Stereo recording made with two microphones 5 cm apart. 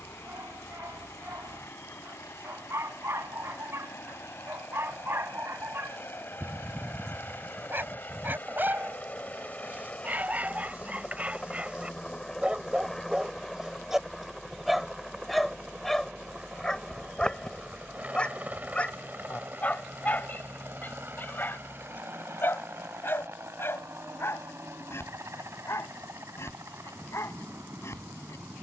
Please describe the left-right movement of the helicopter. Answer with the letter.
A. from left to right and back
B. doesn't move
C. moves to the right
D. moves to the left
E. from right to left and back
C.